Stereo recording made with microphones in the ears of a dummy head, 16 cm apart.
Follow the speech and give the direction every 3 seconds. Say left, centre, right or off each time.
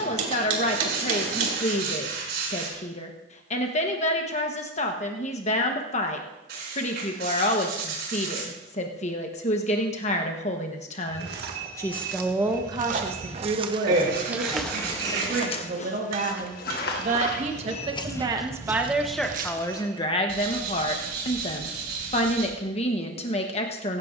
left, left, left, left, right, right, centre, left.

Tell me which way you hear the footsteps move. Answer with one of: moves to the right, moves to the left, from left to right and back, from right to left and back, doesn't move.
from right to left and back.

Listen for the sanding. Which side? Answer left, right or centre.
right.